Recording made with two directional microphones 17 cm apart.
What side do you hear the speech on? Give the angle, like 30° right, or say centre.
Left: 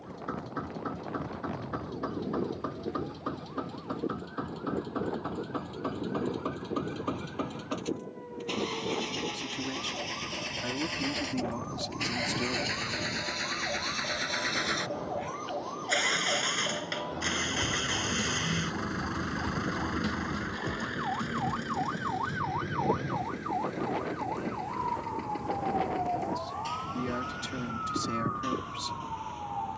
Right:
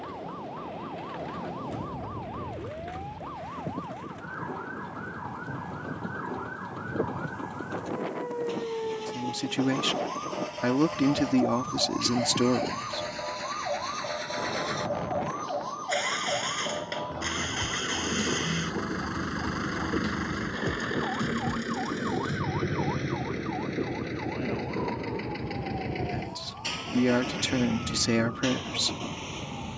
60° right.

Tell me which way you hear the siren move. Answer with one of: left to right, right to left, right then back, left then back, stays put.
right to left.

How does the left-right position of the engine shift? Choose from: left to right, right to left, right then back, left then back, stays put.
left to right.